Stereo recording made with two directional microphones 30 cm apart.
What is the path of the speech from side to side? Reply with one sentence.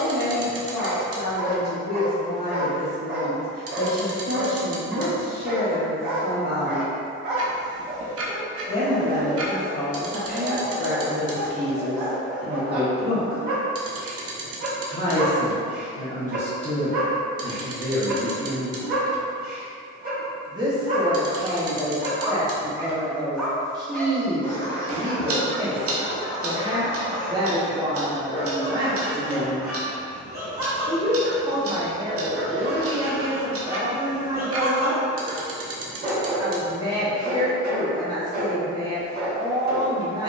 In this clip you hear the speech move to the right.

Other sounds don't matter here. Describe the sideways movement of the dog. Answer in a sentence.
In this clip you hear the dog move from right to left and back again.